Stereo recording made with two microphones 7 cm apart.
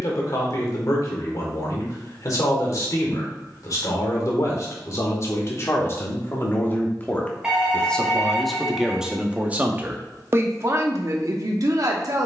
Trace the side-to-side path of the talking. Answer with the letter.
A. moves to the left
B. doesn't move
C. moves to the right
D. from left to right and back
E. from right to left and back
C.